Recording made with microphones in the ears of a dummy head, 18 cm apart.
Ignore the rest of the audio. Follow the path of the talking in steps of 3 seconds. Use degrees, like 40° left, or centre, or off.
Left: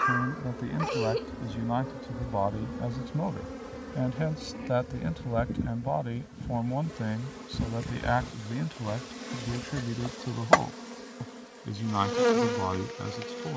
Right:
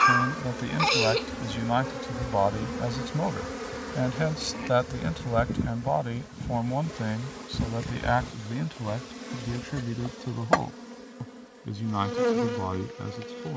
60° right, 30° right, 10° right, 10° left, 20° left.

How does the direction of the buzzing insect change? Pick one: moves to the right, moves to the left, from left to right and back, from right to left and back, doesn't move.
moves to the left.